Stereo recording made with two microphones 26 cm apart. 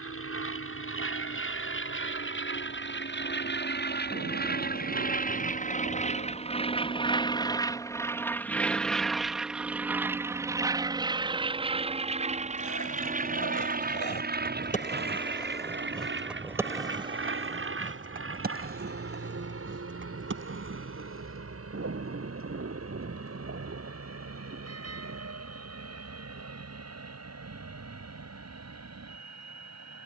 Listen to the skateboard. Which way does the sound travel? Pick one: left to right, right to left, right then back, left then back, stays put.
left to right.